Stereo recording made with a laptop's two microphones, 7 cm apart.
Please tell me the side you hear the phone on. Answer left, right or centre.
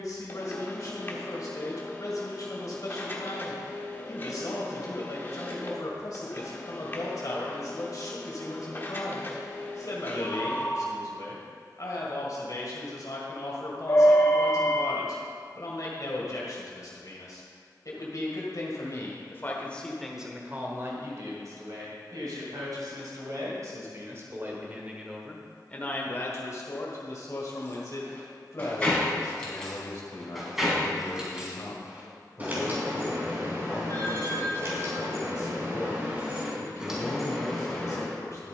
left.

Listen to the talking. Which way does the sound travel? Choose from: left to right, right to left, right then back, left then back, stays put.
right then back.